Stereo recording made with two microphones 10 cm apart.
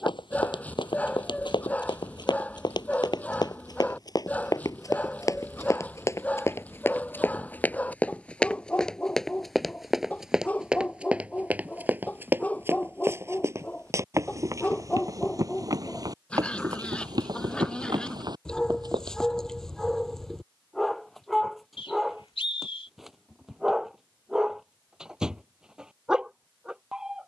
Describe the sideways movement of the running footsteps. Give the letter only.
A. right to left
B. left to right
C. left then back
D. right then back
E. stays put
B.